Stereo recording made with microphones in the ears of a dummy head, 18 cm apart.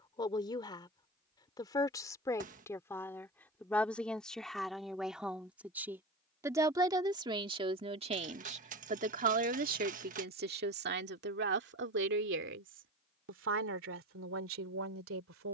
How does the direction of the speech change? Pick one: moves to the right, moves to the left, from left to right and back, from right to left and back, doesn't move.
moves to the right.